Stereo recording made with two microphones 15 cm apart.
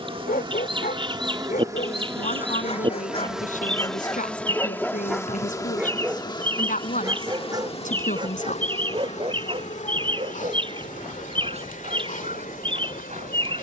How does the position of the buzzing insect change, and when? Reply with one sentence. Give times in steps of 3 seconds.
In this clip you hear the buzzing insect on the right from 0 s, in the centre from 3 s and on the left from 6 s.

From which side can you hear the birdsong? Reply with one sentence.
You can hear the birdsong on the right.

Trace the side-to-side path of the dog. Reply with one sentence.
In this clip you hear the dog travel towards the right.